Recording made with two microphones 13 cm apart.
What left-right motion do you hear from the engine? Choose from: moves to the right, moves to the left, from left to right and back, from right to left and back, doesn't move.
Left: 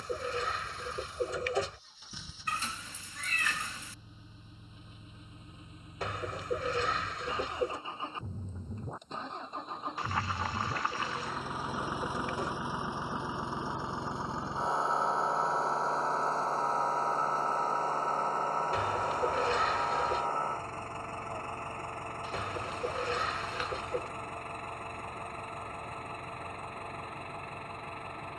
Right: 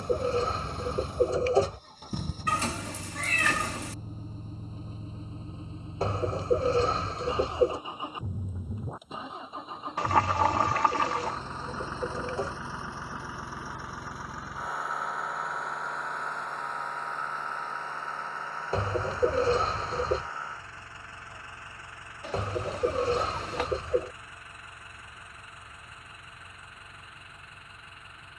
moves to the left.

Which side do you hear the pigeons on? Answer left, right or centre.
right.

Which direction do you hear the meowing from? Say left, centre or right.
right.